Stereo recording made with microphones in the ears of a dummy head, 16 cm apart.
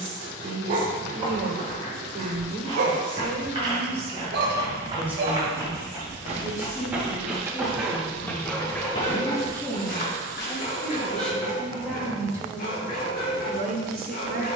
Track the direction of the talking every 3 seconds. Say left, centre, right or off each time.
right, right, left, centre, right.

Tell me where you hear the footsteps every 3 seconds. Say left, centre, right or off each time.
right, right, centre, left, off.